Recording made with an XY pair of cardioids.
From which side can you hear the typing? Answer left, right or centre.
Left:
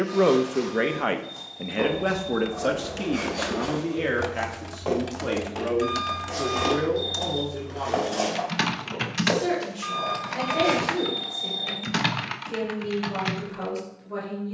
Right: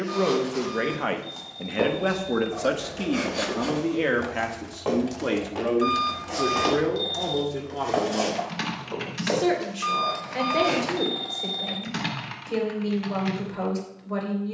left.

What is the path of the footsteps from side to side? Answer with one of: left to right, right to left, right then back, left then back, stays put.
right to left.